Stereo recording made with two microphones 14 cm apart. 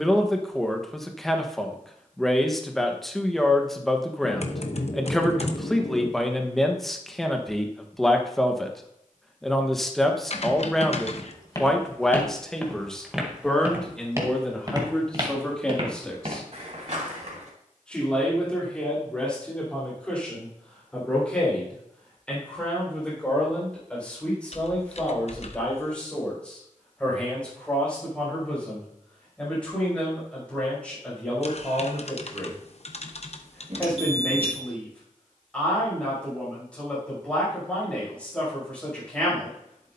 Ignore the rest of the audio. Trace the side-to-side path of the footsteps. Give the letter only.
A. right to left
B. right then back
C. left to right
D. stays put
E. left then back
C.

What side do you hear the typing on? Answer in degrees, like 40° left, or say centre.
50° left.